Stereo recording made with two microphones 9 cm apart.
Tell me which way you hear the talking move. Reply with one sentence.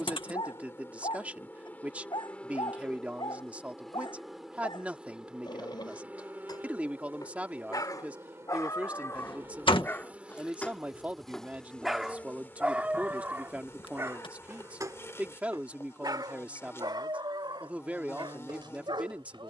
You can hear the talking stay in one place.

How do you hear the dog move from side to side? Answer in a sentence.
You can hear the dog go from the left side to the right.